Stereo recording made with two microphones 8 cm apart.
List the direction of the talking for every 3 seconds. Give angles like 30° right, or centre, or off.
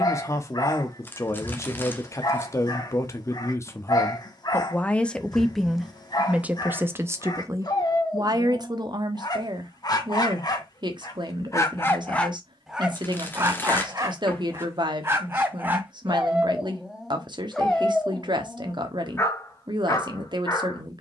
40° left, 20° left, 40° right, 60° right, 60° right, 60° right, 60° right.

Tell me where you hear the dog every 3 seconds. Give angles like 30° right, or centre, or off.
50° left, 50° left, 50° left, 40° left, 20° right, 10° right, 30° left.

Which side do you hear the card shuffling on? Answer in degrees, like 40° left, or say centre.
20° left.